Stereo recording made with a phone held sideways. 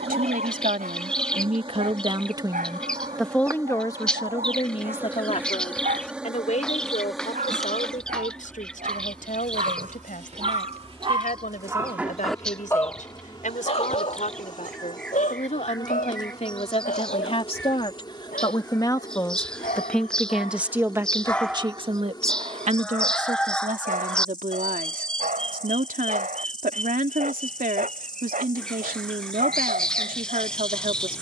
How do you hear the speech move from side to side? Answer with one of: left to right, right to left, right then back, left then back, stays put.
left then back.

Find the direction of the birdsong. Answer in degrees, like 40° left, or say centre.
centre.